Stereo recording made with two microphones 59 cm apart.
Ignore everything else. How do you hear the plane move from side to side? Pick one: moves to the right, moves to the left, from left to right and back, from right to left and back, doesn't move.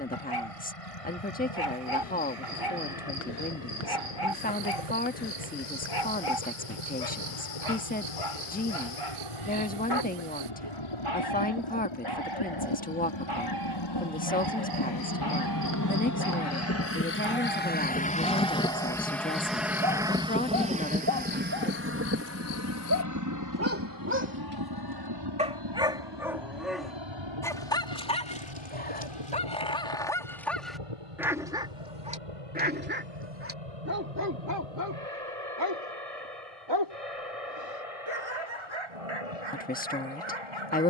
moves to the right.